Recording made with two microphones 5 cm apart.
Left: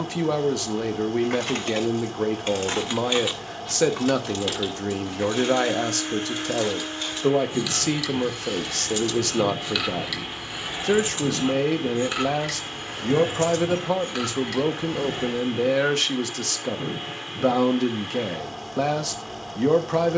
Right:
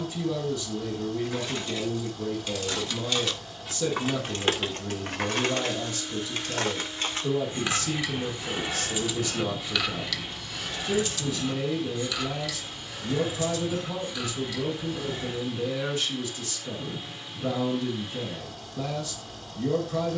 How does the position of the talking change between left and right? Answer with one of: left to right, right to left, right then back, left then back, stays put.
stays put.